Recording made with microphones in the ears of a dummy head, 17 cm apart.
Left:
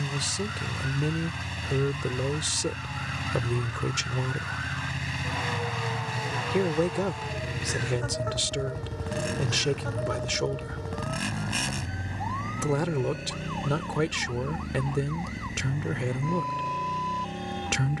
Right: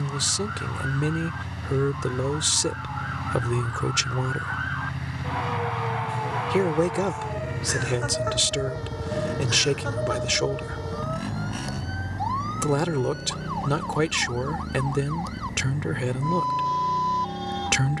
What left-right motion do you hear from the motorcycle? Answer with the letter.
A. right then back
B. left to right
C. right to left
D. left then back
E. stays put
E.